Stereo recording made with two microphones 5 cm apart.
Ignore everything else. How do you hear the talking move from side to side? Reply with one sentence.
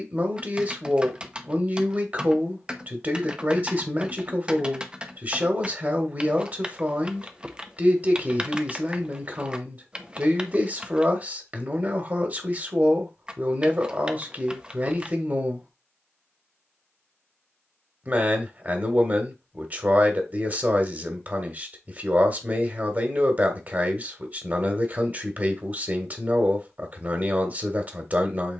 In this clip you hear the talking stay put.